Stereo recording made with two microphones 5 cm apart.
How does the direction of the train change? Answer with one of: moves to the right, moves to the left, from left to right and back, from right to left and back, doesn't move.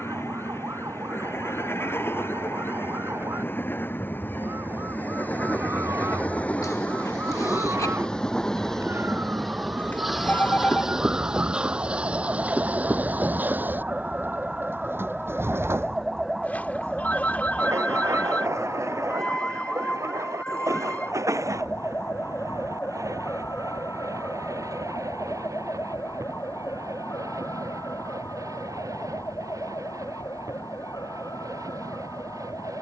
moves to the right.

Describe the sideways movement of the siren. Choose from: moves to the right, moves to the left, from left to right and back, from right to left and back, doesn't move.
moves to the left.